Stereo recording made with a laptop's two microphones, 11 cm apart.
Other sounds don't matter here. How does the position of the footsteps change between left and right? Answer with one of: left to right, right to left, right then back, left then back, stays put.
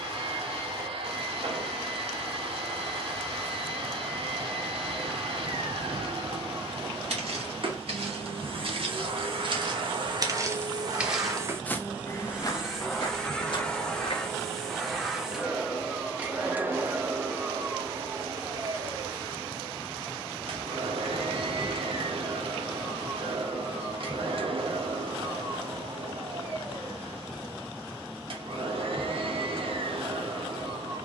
right to left.